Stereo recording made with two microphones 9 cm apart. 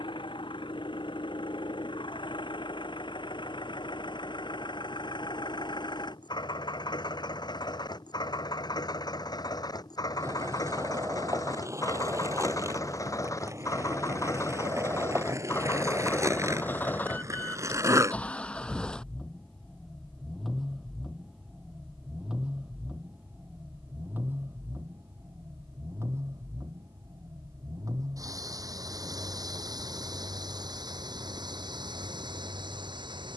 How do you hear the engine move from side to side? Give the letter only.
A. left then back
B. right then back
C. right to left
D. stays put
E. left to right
E.